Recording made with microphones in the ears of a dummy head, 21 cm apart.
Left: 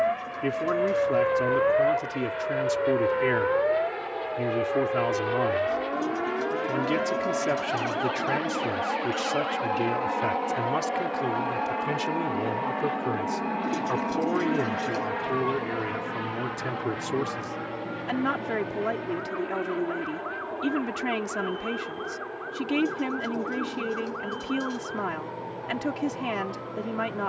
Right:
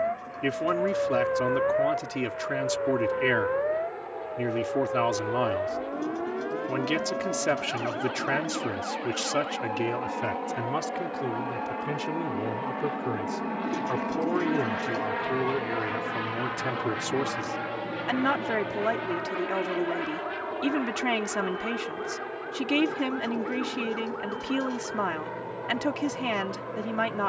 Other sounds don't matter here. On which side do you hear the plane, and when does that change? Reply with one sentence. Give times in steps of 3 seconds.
You can hear the plane on the left from 0 s, in the centre from 12 s and on the right from 15 s.